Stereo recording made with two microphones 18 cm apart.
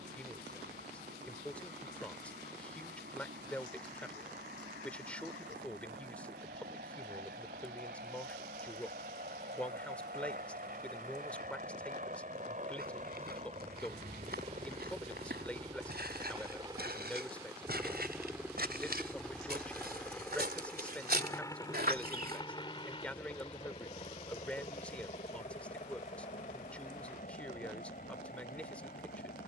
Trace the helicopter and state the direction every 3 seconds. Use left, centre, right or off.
right, right, right, right, right, right, centre, left, left, left.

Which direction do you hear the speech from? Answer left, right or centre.
centre.